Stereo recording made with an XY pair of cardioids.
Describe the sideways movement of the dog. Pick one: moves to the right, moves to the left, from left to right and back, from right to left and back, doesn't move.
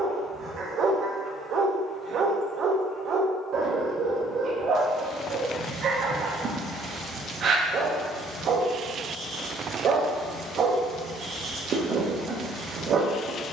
doesn't move.